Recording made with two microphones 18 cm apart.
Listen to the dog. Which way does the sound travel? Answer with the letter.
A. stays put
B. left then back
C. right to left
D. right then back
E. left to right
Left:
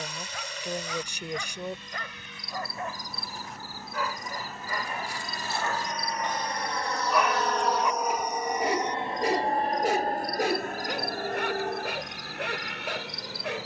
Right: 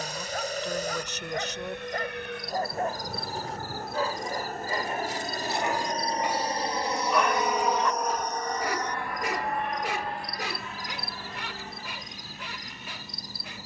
C.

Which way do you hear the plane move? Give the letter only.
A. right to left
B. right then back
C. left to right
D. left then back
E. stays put
A.